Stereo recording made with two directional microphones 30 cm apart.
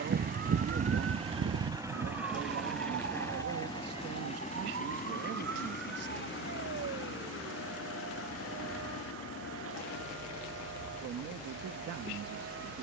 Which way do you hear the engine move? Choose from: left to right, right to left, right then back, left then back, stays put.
right to left.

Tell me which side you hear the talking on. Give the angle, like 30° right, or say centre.
60° right.